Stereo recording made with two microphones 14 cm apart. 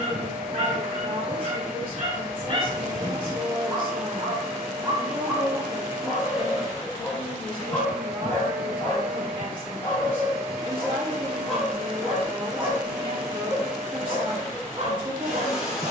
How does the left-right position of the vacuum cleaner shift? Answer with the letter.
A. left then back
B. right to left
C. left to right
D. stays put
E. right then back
D.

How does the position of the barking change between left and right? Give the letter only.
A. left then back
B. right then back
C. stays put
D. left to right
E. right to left
A.